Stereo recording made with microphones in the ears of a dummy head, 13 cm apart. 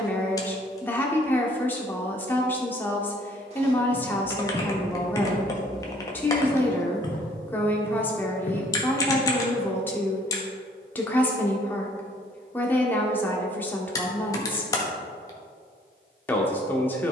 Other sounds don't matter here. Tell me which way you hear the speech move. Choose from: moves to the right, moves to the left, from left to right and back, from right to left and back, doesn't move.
doesn't move.